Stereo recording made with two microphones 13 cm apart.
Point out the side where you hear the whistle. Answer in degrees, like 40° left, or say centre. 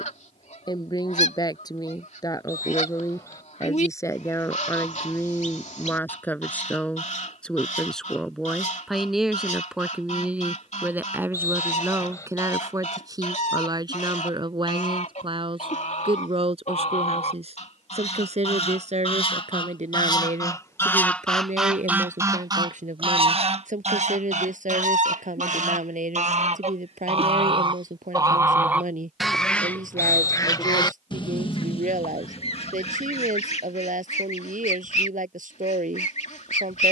20° left.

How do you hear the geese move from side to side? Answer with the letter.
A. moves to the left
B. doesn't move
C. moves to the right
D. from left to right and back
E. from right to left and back
D.